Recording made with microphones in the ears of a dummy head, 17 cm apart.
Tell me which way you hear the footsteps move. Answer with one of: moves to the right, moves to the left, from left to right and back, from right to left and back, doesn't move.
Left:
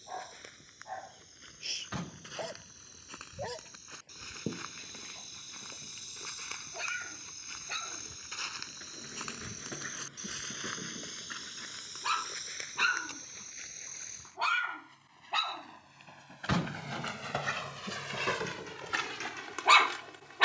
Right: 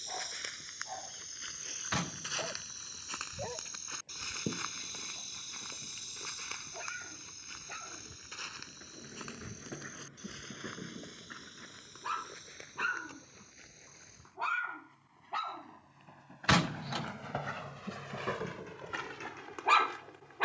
moves to the left.